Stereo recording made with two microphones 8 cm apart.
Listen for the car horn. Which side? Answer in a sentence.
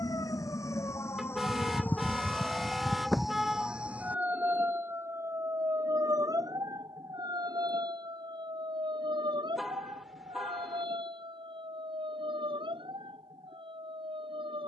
You can hear the car horn in the centre.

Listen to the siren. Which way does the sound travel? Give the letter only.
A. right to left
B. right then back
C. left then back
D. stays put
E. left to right
E.